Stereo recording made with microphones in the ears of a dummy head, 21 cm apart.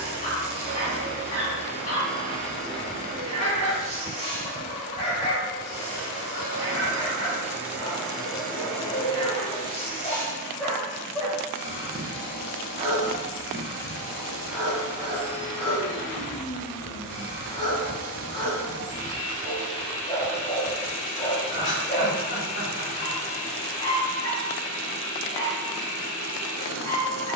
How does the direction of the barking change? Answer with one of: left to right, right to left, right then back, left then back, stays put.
right then back.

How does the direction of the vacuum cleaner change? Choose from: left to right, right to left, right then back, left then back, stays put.
right to left.